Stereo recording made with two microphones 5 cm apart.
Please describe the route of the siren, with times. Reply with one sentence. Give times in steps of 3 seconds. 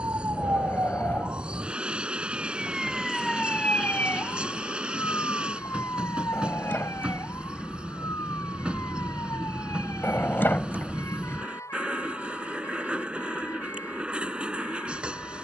In this clip you hear the siren on the right from 0 s and on the left from 3 s.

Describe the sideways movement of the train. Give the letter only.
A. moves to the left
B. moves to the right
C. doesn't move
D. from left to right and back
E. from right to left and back
C.